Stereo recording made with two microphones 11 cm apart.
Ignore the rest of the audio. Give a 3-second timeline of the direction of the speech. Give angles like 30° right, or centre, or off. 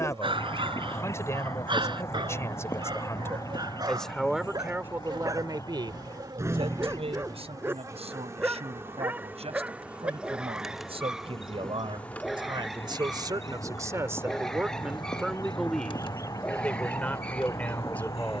30° left, 10° right, 70° right, 70° right, 30° right, 10° left.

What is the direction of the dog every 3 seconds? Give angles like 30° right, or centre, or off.
50° right, 40° right, 20° right, 10° right, centre, 10° left.